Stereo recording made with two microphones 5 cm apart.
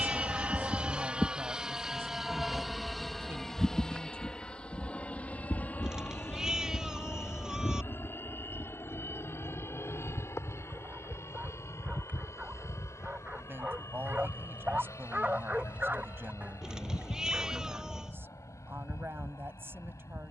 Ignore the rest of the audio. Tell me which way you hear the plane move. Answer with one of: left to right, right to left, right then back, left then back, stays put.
right to left.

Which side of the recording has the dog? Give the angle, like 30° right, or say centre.
30° right.